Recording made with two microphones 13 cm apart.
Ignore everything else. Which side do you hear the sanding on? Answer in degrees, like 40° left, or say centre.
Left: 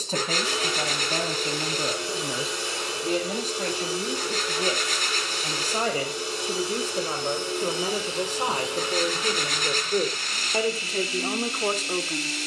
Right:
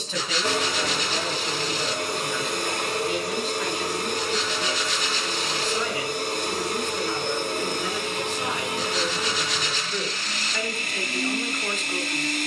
50° left.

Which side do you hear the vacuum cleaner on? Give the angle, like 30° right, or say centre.
60° right.